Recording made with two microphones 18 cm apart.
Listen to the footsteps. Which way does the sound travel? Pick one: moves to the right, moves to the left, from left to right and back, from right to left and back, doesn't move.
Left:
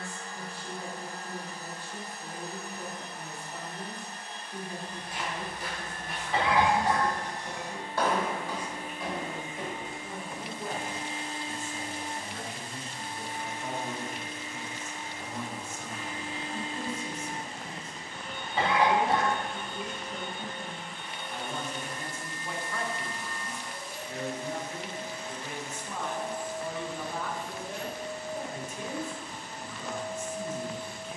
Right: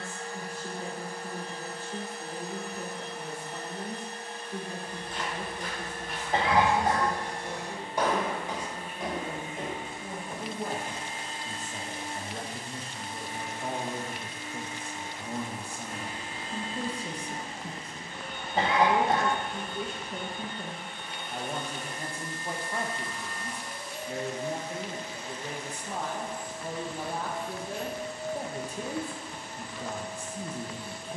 moves to the right.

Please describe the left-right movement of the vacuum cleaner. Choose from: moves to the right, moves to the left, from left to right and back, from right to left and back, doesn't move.
doesn't move.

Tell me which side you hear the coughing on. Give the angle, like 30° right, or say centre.
40° right.